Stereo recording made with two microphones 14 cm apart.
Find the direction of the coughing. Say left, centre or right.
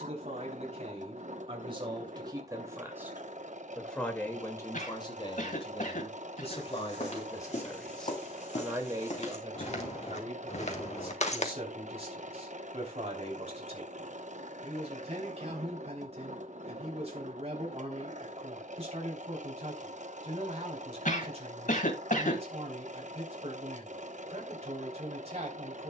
left.